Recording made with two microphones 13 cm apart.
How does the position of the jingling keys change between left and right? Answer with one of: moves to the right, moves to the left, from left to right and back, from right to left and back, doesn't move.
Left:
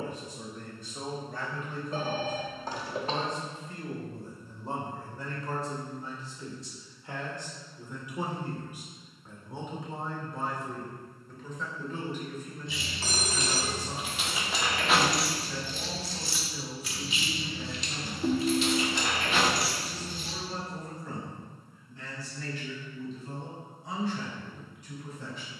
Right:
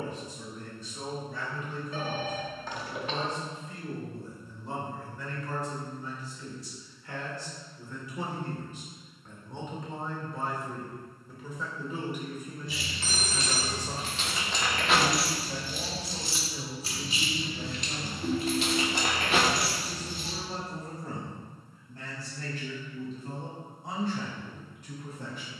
moves to the right.